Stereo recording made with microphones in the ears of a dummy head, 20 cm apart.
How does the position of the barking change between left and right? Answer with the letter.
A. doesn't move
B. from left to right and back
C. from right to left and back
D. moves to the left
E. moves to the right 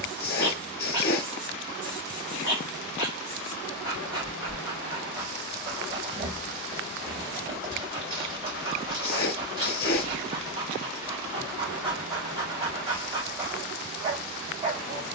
A.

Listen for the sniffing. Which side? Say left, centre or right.
left.